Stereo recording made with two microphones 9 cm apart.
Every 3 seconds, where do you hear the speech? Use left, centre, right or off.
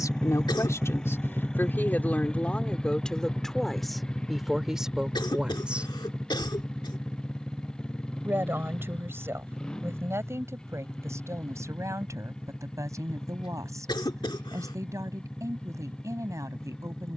left, centre, right, right, right, right.